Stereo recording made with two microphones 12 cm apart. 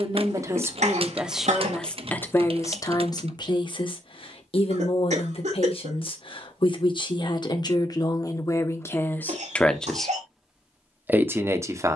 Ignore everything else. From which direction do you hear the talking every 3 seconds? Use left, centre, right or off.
centre, left, left, centre.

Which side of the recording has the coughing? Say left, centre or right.
right.